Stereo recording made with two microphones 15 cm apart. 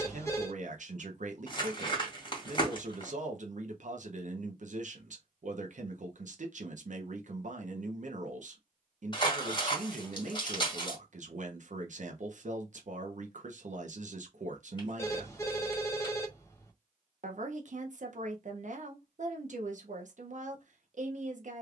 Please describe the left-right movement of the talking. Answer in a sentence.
In this clip you hear the talking stay in one place.